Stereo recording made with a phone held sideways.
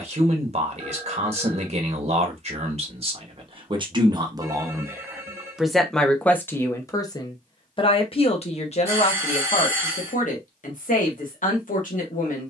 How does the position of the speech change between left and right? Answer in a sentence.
You can hear the speech go from the right side to the left.